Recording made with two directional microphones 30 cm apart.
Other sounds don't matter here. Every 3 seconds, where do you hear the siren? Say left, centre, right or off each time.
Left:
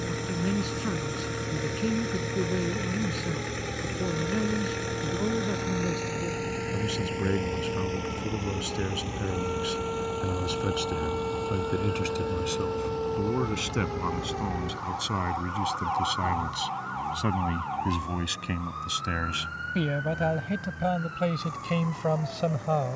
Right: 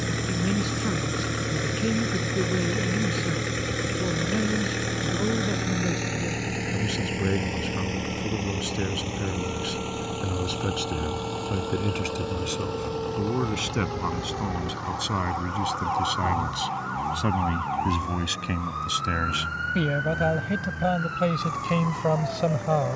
left, left, left, left, centre, right, right, right.